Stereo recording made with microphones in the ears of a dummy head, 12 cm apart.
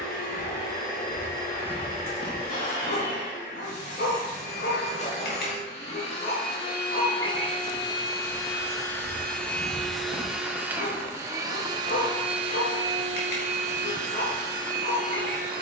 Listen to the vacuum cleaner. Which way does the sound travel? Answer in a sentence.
In this clip you hear the vacuum cleaner move to the right.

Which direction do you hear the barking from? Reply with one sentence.
In this clip you hear the barking on the left.